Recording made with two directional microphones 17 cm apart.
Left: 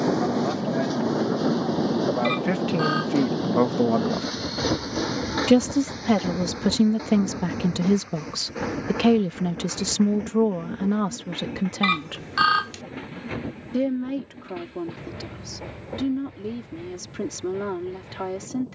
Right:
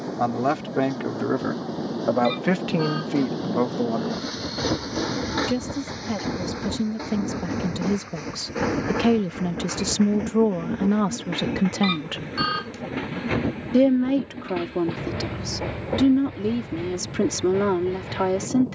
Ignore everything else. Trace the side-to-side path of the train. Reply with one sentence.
In this clip you hear the train travel towards the right.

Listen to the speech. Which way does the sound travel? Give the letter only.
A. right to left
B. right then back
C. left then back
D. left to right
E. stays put
C.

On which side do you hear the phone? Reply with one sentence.
In this clip you hear the phone on the left.